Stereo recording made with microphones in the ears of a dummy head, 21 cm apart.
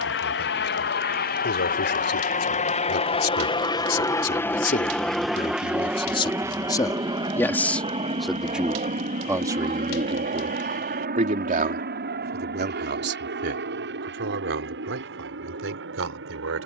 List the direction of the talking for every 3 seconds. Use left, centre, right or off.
left, left, centre, right, right, right.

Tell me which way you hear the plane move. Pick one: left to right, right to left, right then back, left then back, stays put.
left to right.